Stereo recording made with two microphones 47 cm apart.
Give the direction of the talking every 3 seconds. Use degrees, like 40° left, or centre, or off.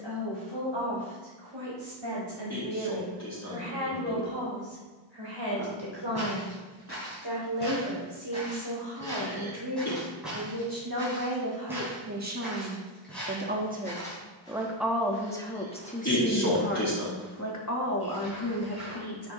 70° right, 70° right, 60° right, 50° right, 20° right, 20° left, 50° left.